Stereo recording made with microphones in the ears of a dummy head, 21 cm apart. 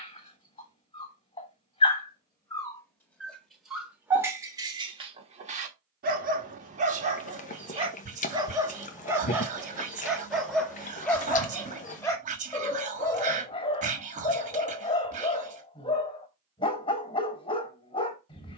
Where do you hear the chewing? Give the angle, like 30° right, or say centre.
30° left.